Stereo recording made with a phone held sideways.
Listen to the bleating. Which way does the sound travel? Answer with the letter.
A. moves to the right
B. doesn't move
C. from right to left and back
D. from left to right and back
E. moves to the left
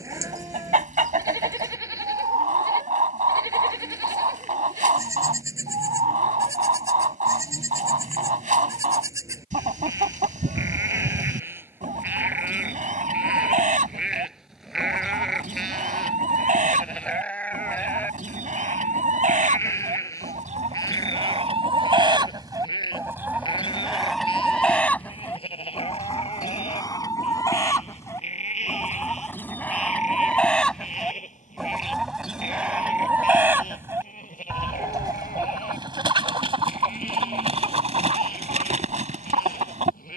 E.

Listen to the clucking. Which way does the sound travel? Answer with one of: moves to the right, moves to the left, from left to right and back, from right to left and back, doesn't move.
from right to left and back.